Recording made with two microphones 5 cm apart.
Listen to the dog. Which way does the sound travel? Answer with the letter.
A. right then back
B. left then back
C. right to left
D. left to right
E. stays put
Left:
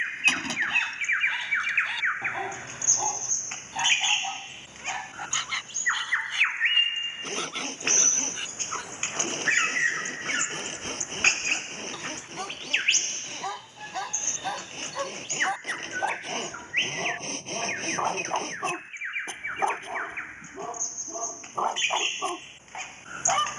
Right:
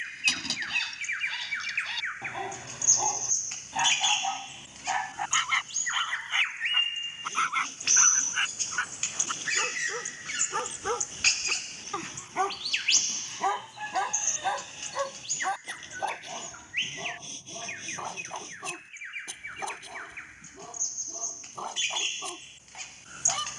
A.